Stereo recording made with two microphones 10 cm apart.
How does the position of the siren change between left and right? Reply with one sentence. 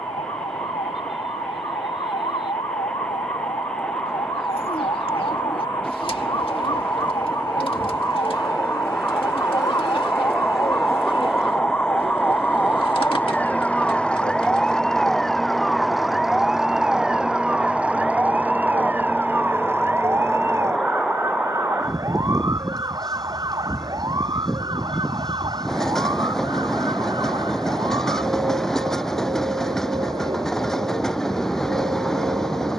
In this clip you hear the siren move from left to right.